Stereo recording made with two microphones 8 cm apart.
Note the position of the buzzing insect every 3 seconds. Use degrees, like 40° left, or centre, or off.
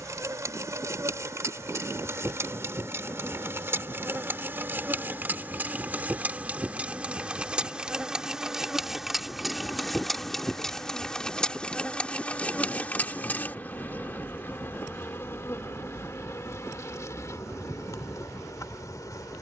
40° right, 30° right, 10° right, centre, 20° left, 40° left, 50° left.